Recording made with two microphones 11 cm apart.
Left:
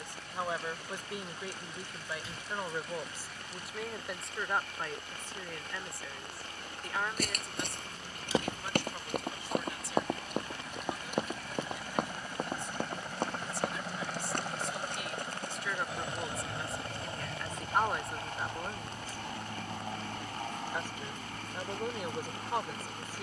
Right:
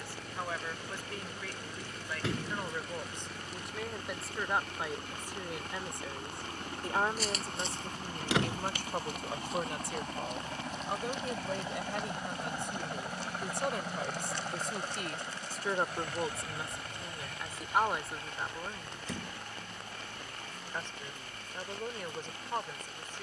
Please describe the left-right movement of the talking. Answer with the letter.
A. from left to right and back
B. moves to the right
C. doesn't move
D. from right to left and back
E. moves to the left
A.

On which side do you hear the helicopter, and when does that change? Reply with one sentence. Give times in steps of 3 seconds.
You can hear the helicopter on the right from 0 s, in the centre from 12 s and on the left from 15 s.